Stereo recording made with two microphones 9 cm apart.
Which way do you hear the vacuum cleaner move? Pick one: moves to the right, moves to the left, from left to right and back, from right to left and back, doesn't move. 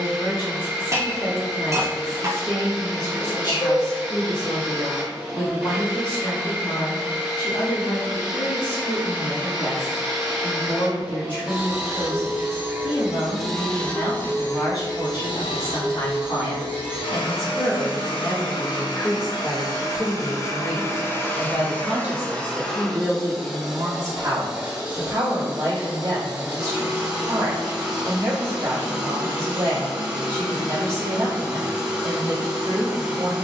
from right to left and back.